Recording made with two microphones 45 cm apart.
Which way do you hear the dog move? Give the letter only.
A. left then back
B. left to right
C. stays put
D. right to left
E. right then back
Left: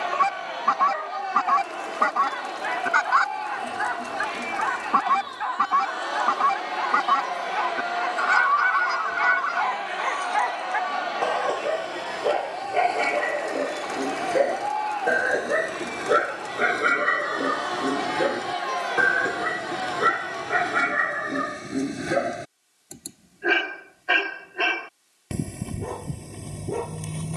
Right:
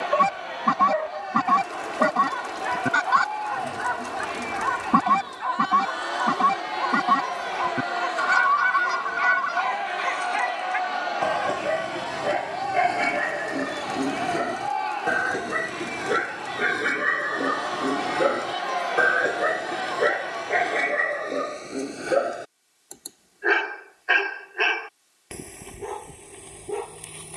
D.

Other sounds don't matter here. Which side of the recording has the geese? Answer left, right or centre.
right.